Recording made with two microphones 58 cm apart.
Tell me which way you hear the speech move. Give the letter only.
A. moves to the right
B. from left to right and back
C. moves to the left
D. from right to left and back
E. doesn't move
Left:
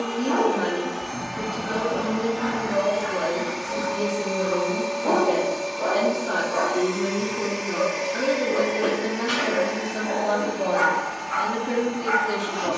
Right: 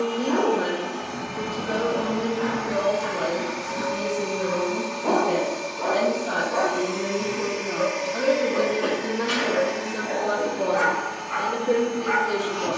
B.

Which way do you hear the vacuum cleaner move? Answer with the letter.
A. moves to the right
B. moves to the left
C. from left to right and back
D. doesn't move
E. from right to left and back
D.